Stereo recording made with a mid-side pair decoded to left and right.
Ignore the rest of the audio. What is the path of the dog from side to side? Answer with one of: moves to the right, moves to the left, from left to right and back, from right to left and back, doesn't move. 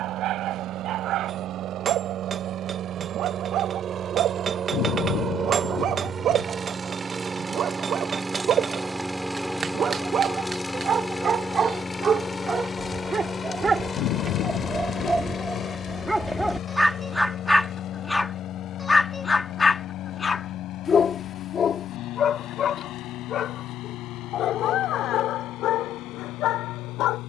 moves to the left.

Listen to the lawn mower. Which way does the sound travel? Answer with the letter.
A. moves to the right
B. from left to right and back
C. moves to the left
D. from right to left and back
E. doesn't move
C.